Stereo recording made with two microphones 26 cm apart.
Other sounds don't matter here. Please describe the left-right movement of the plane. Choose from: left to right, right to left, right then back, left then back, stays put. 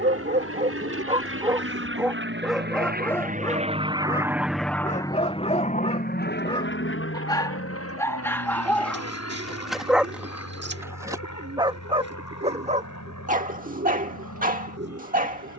right to left.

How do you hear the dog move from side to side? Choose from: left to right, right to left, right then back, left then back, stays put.
left then back.